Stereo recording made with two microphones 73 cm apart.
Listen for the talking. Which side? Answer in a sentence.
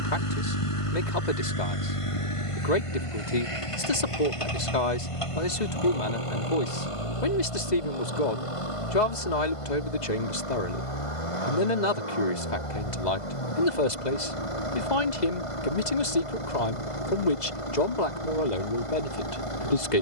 You can hear the talking on the left.